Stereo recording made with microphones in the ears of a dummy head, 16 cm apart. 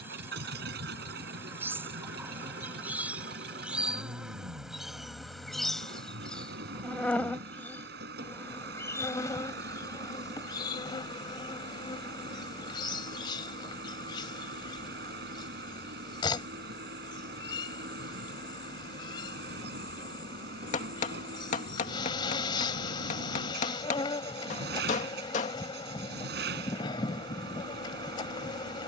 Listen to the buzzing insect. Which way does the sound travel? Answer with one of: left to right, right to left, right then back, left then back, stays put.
right to left.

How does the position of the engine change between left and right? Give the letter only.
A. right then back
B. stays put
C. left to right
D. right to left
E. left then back
B.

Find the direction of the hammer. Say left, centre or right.
left.